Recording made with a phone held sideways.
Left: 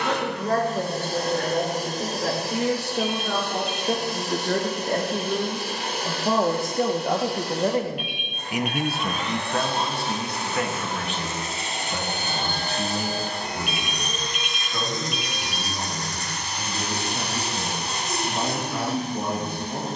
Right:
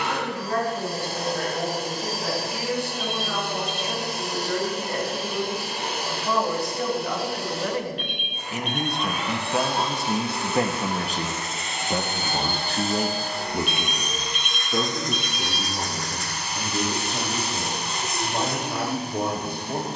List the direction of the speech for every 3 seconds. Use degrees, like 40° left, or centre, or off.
70° left, 60° left, 30° left, 20° right, 60° right, 70° right, 70° right.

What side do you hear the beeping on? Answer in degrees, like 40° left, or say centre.
10° left.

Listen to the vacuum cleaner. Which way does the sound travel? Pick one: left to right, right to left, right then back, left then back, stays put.
stays put.